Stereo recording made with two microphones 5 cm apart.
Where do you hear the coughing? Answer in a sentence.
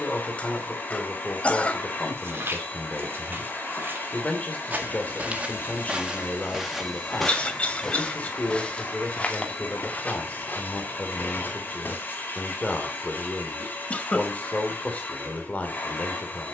You can hear the coughing on the left.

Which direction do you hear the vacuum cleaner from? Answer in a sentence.
In this clip you hear the vacuum cleaner on the left.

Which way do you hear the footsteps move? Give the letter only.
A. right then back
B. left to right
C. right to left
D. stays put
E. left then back
C.